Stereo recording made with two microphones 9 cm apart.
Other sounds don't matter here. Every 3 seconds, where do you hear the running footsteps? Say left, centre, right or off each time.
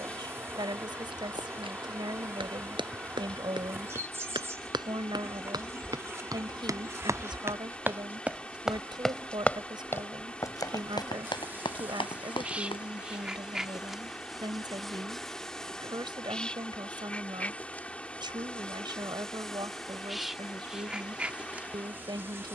right, right, right, left, left, off, off, off.